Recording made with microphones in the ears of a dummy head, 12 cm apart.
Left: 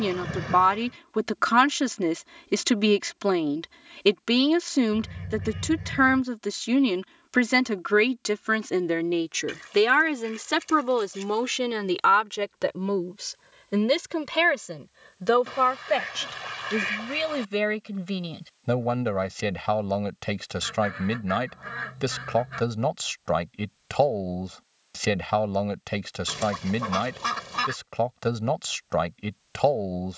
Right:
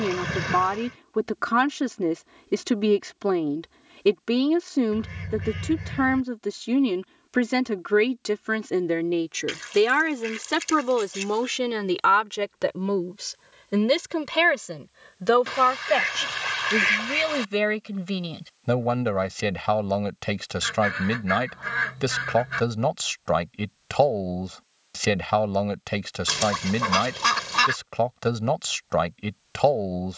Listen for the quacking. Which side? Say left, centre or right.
right.